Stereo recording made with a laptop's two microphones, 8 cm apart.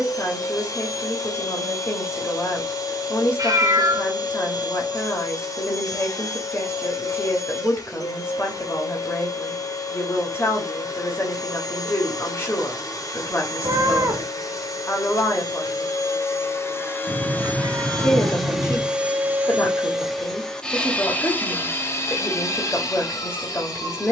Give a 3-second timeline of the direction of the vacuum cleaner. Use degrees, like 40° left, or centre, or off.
50° left, 50° left, 50° left, 50° left, 50° left, 30° left, centre, 40° left.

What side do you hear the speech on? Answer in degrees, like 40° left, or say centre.
30° left.